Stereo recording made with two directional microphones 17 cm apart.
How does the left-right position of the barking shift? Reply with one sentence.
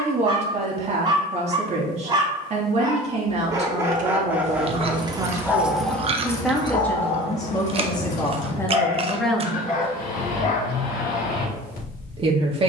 In this clip you hear the barking go from the right side to the left.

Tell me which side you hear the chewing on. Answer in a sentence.
You can hear the chewing on the right.